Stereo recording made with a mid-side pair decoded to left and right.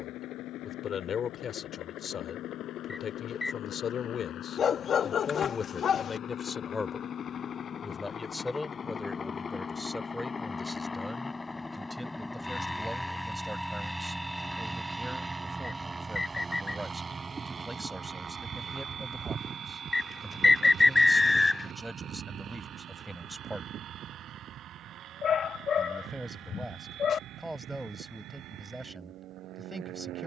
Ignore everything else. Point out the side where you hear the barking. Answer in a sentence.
In this clip you hear the barking on the left.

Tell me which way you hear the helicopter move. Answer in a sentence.
In this clip you hear the helicopter go from the left side to the right.